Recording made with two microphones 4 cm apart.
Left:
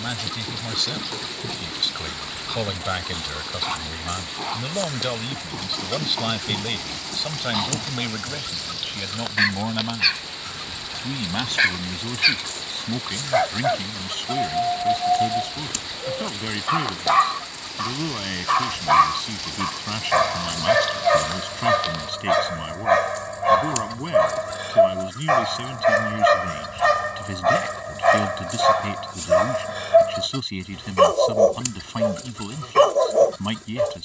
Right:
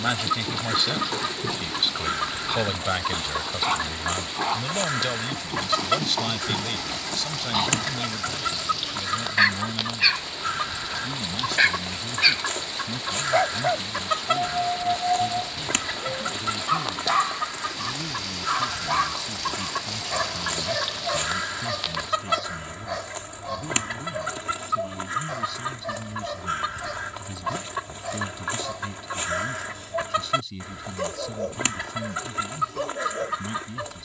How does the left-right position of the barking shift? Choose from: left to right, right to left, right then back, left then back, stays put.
right to left.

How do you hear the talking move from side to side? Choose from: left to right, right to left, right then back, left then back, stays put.
right to left.